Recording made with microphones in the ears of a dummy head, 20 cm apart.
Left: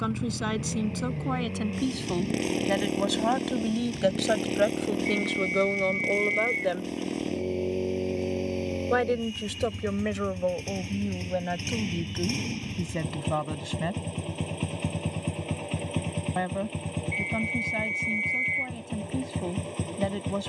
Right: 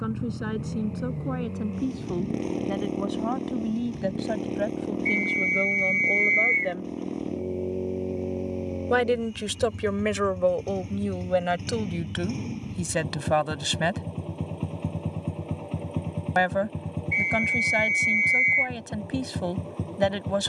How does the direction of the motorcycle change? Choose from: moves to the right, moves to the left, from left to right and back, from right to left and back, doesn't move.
doesn't move.